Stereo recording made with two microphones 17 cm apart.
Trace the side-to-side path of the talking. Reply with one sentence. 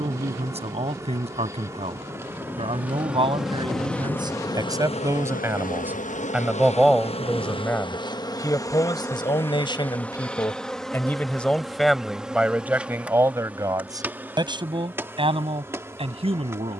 In this clip you hear the talking move from right to left and back again.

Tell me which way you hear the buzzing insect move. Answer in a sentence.
In this clip you hear the buzzing insect move from right to left and back again.